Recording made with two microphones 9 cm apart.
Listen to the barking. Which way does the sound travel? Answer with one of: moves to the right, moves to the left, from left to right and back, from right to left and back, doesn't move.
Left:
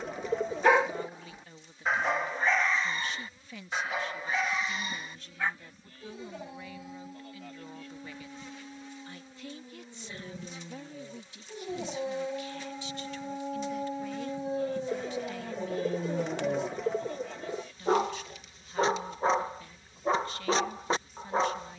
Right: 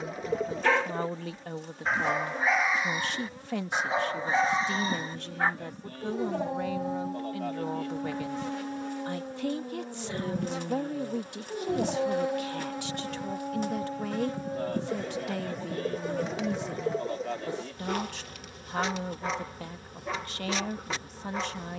from left to right and back.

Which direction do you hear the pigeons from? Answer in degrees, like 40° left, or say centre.
centre.